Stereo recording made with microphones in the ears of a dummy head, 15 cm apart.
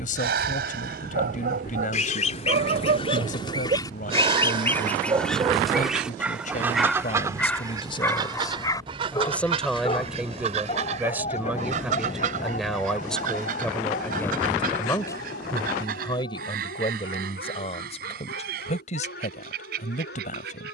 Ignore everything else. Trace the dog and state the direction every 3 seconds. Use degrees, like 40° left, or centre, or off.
60° right, 30° right, 10° left, 30° left, 50° left, 60° left, 60° left.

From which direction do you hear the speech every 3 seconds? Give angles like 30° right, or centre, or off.
50° left, 50° left, 40° left, centre, 10° left, 30° left, 40° left.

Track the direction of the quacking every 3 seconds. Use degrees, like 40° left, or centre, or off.
50° left, 10° left, 20° right, 40° right, 50° right, 60° right, 60° right.